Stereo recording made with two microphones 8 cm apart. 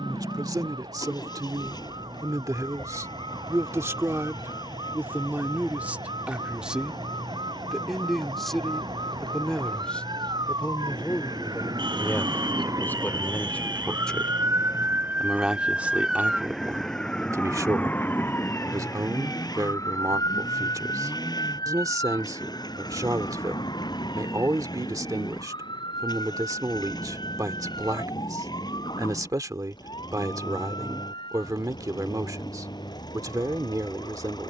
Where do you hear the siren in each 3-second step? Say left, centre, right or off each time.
right, right, right, right, right, centre, left, left, left, left, left, left.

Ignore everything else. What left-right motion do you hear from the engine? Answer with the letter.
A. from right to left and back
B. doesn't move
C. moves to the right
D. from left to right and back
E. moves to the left
B.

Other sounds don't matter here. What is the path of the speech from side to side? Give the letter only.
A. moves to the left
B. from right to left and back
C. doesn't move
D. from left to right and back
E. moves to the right
B.